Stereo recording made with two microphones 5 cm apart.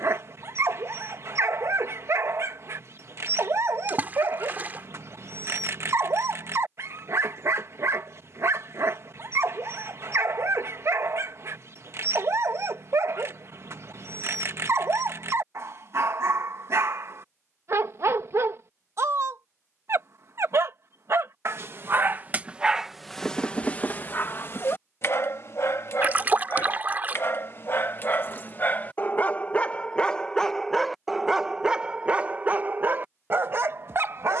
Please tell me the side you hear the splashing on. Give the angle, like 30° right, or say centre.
30° right.